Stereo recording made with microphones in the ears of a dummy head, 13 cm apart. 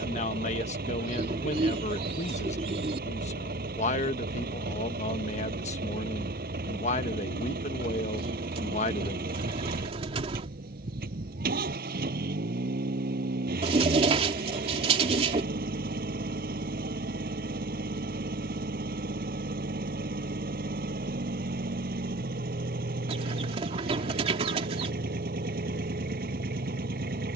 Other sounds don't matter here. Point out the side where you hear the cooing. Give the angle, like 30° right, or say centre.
40° right.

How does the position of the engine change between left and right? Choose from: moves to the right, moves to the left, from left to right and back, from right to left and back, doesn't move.
doesn't move.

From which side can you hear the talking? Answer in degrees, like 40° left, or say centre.
50° left.